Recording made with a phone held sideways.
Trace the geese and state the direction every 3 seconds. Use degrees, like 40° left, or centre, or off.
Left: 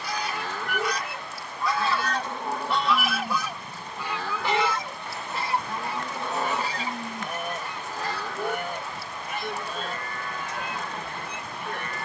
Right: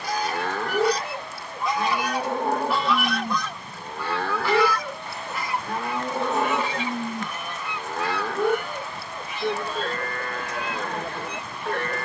30° right, 20° left, 40° left, 50° left.